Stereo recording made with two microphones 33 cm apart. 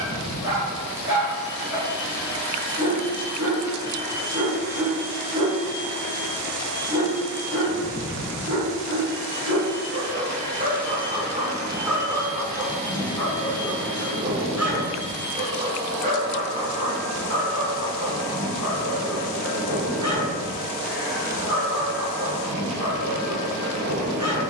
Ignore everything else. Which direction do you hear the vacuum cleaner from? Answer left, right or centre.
centre.